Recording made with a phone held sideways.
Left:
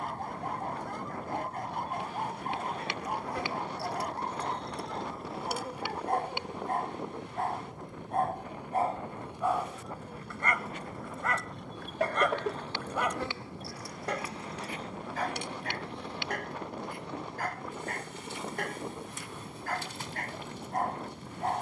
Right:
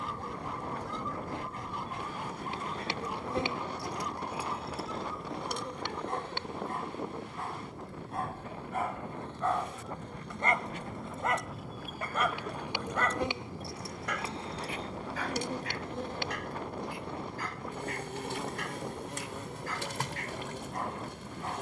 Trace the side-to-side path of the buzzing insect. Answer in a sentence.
In this clip you hear the buzzing insect go left and come back.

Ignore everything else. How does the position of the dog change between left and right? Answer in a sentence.
You can hear the dog go right and come back.